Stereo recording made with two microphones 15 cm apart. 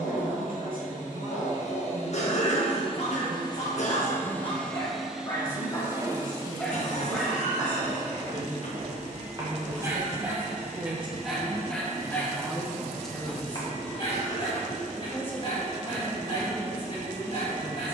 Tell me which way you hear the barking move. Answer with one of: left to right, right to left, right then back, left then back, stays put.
right then back.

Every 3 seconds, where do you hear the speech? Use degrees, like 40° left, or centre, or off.
70° right, 70° right, 70° right, 40° right, centre, 10° left.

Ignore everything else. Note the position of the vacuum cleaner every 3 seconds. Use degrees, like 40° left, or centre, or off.
50° left, 10° left, 40° right, 50° right, 50° right, 50° right.